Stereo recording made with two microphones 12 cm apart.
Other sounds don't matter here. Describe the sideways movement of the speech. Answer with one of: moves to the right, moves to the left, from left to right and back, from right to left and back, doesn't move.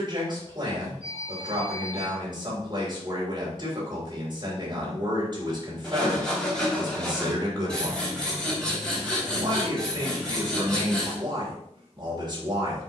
doesn't move.